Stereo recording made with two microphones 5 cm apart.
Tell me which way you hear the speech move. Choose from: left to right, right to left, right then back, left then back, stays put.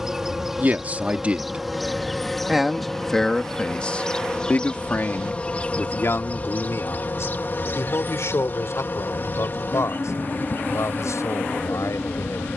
right to left.